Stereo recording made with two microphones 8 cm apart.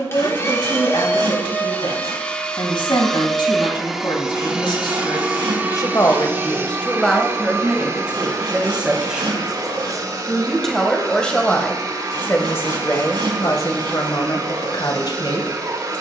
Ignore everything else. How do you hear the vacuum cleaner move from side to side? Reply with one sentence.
You can hear the vacuum cleaner move from left to right.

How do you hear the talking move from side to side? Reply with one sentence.
In this clip you hear the talking move from left to right and back again.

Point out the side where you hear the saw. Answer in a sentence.
You can hear the saw on the right.